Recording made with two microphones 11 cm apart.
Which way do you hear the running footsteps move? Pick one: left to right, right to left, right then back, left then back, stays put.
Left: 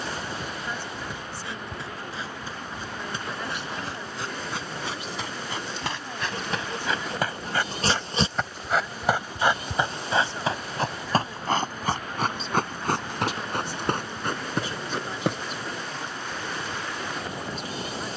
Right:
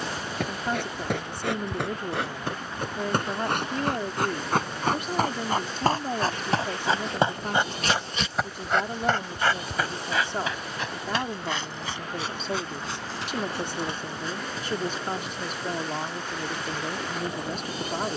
right to left.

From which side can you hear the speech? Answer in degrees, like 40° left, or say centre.
50° right.